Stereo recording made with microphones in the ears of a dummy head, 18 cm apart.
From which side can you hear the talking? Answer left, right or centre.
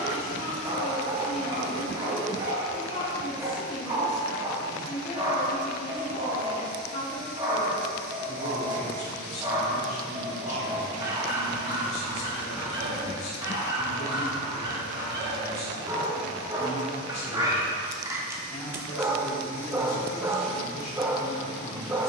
left.